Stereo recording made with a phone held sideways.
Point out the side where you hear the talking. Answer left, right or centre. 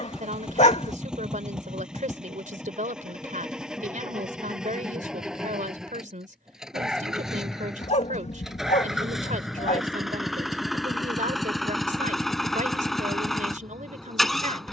right.